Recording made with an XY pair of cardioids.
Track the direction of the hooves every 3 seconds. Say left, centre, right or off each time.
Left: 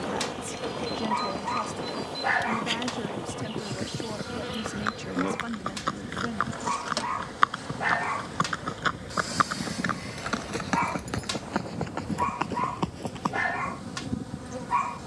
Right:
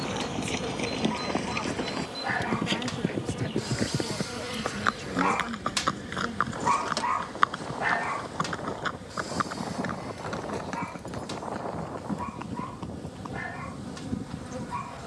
right, right, centre, left, left.